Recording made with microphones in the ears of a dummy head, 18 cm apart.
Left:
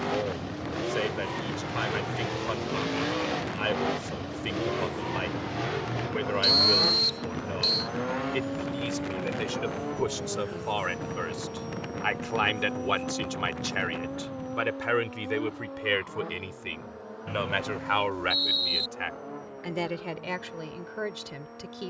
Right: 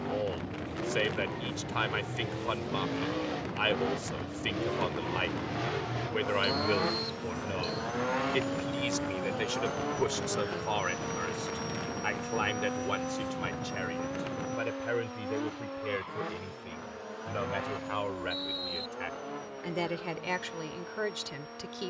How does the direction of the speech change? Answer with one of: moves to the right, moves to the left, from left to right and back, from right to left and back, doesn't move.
from right to left and back.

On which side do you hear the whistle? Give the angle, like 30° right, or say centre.
40° left.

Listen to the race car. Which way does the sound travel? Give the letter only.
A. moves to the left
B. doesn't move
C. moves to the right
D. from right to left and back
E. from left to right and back
C.